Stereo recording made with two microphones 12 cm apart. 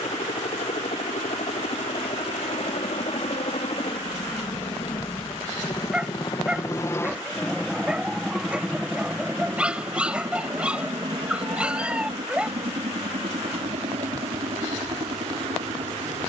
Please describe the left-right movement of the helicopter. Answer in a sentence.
You can hear the helicopter go from the left side to the right.